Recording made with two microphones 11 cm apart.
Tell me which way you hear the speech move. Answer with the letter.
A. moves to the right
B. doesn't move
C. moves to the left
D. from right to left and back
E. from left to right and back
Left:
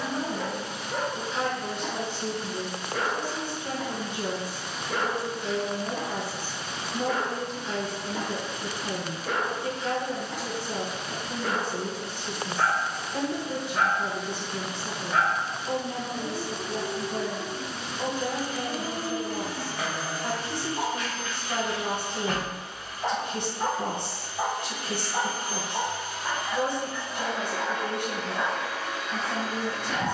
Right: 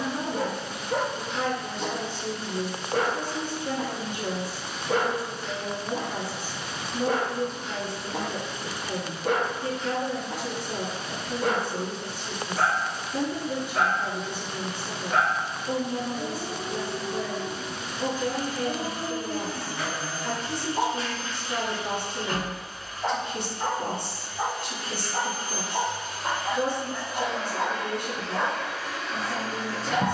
B.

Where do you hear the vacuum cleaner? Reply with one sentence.
In this clip you hear the vacuum cleaner on the left.